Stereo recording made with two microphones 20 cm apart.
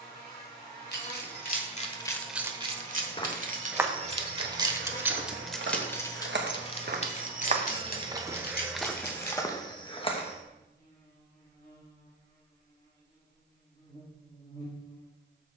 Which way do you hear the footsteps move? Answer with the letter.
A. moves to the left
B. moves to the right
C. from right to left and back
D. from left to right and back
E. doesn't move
D.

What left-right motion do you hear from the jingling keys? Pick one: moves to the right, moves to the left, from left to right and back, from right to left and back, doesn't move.
from left to right and back.